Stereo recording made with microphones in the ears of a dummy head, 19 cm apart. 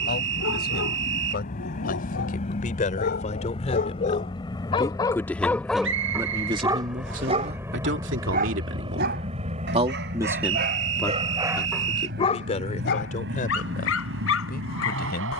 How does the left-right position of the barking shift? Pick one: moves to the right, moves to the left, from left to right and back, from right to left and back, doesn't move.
from left to right and back.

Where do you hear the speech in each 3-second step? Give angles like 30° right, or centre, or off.
40° left, 20° left, 40° right, 10° right, 40° left.